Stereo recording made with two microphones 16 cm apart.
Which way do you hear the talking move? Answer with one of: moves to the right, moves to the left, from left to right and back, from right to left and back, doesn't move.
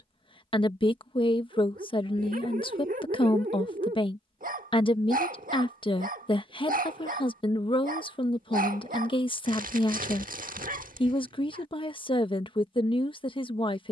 doesn't move.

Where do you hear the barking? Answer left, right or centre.
right.